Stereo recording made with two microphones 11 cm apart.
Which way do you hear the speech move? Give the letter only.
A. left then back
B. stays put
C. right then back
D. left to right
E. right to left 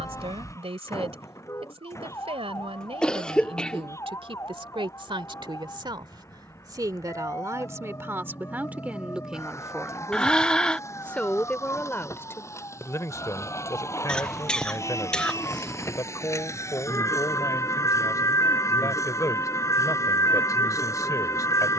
E.